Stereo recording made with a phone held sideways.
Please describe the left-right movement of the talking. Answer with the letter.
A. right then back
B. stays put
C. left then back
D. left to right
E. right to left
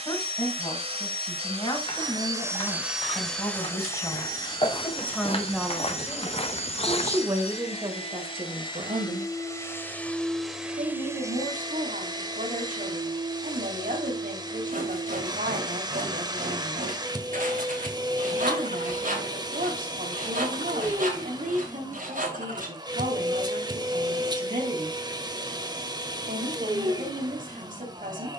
D.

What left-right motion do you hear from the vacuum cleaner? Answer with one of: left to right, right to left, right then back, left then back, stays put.
left then back.